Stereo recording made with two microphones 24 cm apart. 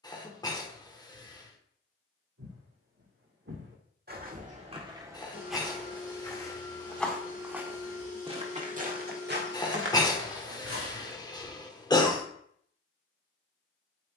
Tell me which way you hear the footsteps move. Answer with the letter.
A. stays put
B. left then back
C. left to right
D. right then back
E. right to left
B.